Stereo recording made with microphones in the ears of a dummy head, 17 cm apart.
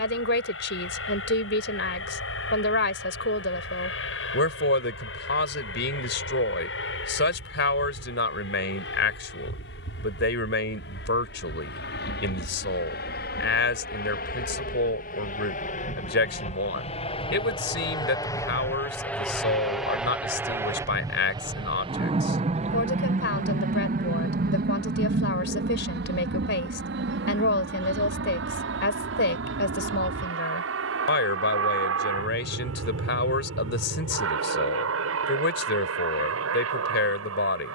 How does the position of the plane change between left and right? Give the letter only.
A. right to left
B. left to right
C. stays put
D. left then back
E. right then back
B.